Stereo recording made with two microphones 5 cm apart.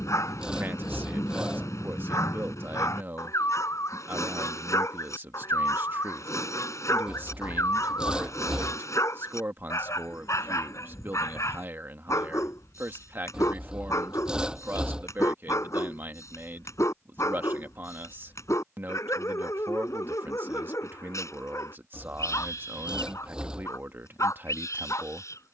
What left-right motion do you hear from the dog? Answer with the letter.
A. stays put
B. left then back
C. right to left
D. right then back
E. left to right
A.